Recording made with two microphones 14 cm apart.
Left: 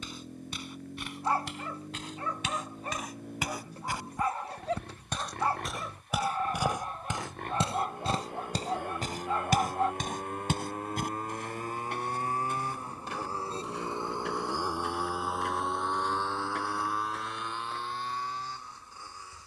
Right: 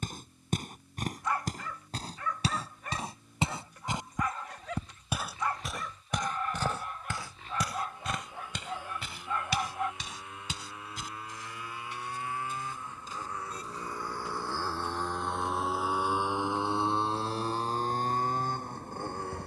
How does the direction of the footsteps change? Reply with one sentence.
You can hear the footsteps move to the left.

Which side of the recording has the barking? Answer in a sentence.
In this clip you hear the barking on the left.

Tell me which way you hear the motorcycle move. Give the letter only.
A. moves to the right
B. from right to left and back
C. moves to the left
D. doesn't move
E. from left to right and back
A.